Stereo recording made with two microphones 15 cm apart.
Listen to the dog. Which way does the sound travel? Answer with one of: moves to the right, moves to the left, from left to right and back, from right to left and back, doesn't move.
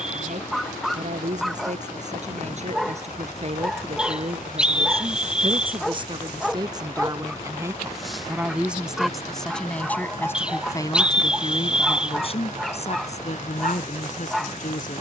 doesn't move.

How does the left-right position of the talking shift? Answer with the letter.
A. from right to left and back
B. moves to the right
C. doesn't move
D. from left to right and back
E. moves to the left
E.